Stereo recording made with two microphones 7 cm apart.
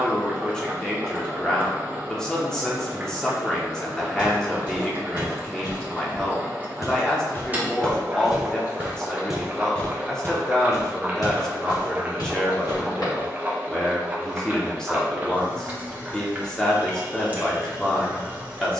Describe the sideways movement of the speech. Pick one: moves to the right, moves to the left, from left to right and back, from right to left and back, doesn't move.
doesn't move.